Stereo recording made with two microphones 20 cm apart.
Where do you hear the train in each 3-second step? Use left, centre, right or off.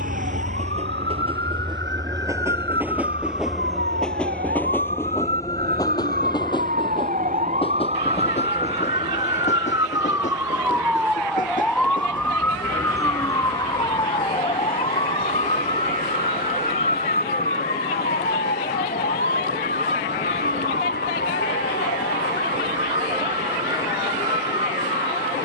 right, centre, left, left, left, left, left, left, left.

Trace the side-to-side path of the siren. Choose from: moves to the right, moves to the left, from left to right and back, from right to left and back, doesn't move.
moves to the left.